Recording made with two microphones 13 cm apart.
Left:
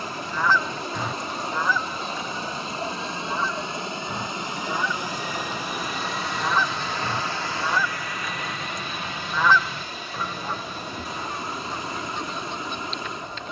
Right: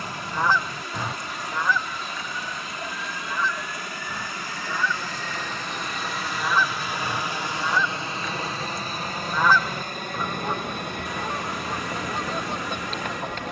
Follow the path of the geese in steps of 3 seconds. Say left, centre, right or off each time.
centre, left, centre, right, right.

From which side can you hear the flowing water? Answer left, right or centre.
left.